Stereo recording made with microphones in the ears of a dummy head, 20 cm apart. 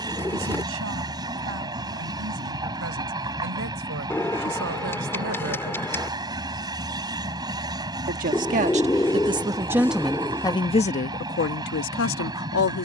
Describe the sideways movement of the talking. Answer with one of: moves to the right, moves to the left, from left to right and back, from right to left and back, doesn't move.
moves to the left.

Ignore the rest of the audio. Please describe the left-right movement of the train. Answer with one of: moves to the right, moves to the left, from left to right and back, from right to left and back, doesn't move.
doesn't move.